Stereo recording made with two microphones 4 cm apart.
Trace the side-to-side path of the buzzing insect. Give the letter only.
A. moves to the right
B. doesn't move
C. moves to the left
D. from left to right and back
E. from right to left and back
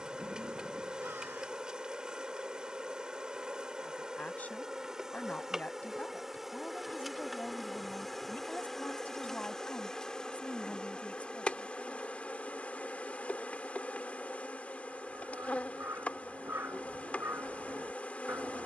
C.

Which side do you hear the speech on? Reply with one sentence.
You can hear the speech on the left.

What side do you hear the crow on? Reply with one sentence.
You can hear the crow on the right.